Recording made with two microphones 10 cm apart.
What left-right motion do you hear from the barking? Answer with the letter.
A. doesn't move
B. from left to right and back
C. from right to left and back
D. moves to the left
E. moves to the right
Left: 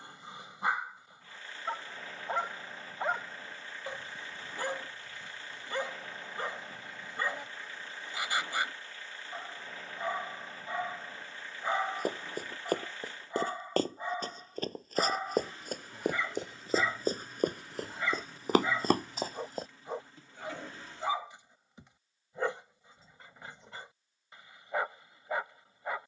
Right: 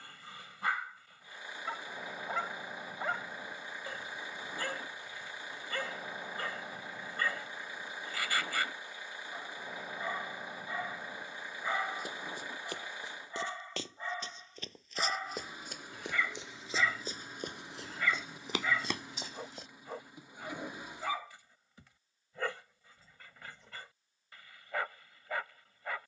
A.